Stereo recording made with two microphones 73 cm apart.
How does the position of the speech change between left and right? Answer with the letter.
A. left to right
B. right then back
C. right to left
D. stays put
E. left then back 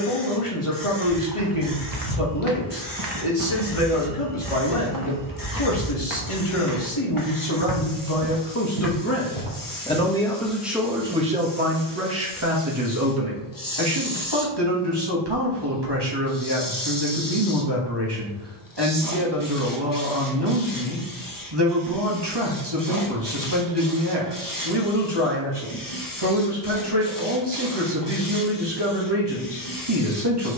A.